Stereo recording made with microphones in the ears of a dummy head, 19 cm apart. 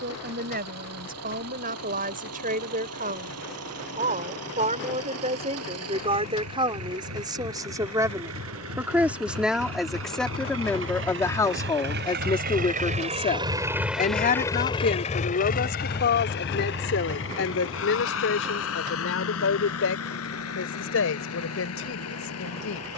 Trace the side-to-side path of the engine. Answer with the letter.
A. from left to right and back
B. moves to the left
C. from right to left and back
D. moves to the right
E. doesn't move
B.